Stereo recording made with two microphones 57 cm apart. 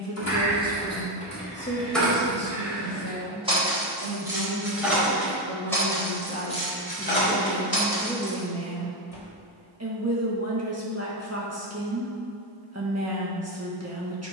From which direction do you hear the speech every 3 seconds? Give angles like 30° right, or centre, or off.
10° left, 30° left, centre, 30° right, 30° right.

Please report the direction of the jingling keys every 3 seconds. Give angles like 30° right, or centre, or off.
10° left, centre, 20° left, off, off.